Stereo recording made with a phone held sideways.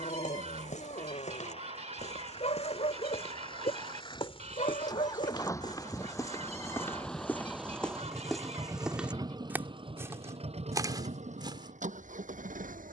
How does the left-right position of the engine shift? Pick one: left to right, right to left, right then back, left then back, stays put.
left to right.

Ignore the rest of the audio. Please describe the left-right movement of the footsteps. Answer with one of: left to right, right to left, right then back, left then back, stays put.
left to right.